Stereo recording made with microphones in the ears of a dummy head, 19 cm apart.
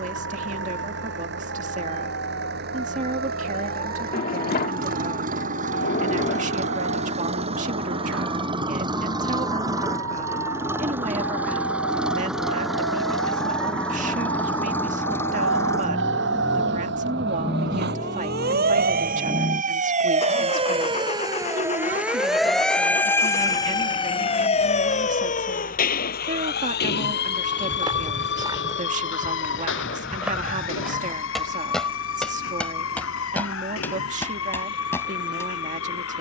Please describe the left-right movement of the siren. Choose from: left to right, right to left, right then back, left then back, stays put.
right to left.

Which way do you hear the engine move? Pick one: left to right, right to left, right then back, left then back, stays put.
right to left.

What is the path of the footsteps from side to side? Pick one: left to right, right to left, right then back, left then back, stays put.
right to left.